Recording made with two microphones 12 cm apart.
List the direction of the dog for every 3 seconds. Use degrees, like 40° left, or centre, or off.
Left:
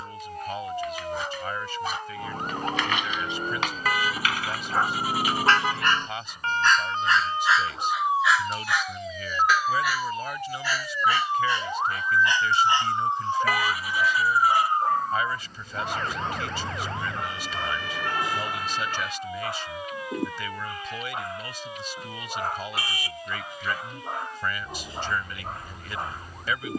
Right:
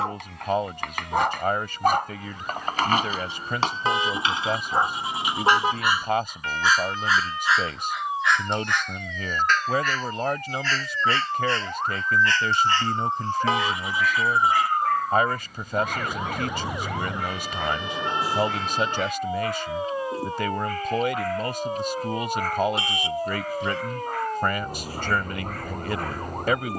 60° right, 20° right, centre, 10° left, 20° left, 20° left, 20° left, 20° left, 20° left.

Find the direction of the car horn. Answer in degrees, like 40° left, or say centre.
20° right.